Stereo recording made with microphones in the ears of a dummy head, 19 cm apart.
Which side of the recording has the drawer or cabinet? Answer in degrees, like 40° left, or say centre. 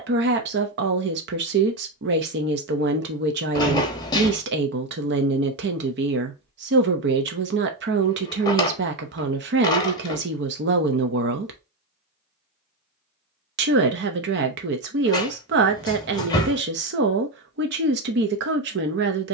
20° left.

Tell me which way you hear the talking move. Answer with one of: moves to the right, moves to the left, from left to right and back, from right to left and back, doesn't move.
doesn't move.